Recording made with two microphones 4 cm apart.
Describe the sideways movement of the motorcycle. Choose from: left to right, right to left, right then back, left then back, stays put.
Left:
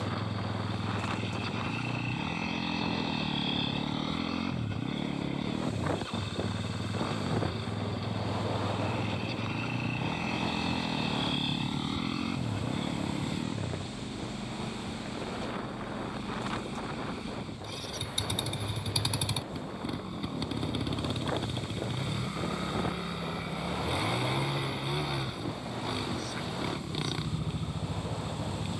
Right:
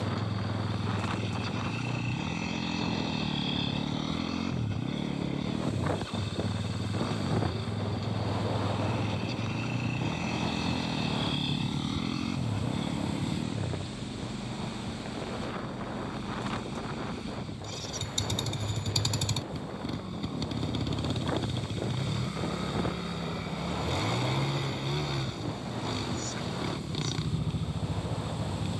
stays put.